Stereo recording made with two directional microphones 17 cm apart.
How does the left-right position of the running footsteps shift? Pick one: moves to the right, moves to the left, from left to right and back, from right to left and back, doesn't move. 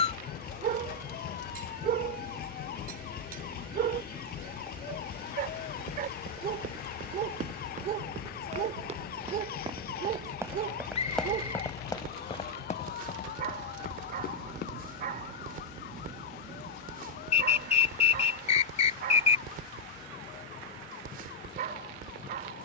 moves to the left.